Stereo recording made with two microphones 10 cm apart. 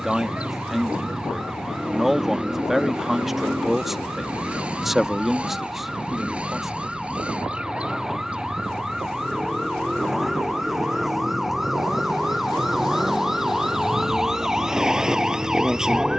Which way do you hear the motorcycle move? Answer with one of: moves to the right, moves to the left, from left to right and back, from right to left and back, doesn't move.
doesn't move.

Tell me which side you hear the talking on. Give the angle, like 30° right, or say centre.
centre.